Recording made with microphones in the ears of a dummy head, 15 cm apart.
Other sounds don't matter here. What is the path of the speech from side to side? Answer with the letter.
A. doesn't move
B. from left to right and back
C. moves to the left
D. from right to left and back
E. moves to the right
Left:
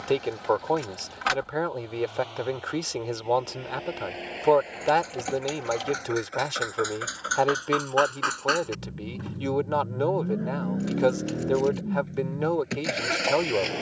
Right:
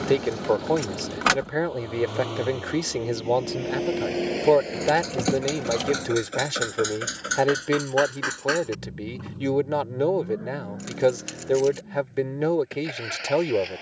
A.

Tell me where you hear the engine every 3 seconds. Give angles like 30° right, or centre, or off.
60° right, 50° right, 20° right, 30° left, 50° left.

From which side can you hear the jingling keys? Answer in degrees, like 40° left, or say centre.
60° right.